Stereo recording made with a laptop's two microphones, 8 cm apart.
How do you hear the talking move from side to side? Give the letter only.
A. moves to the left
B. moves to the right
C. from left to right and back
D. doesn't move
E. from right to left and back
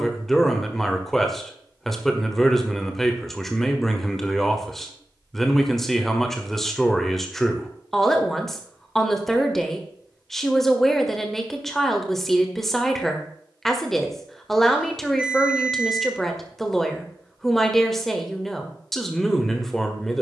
D.